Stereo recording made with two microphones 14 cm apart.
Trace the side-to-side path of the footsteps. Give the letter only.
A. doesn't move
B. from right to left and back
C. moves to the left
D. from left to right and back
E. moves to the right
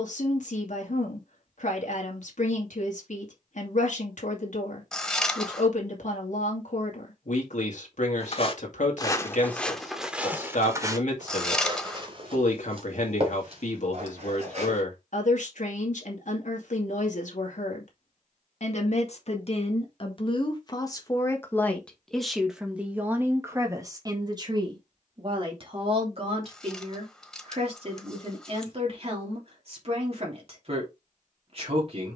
E.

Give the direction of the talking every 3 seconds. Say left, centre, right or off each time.
left, left, left, left, left, left, left, centre, right, right, right.